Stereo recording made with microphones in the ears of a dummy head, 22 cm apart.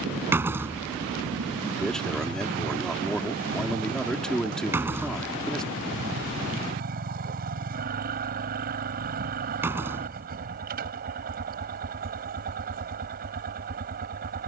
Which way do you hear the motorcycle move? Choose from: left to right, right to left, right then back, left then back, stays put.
stays put.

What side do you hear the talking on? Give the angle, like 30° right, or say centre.
centre.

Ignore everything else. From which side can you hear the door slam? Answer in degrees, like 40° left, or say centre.
10° right.